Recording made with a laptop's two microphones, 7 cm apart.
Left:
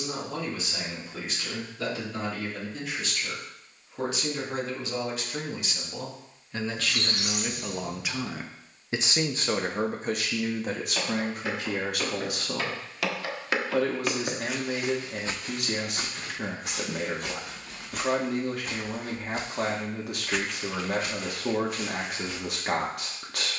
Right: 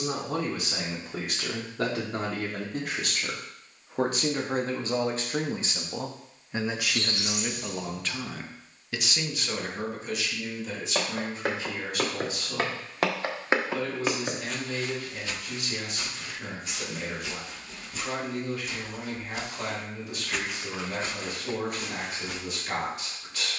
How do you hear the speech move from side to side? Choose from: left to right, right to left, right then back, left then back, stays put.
right to left.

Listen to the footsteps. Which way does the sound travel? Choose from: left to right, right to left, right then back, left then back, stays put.
left then back.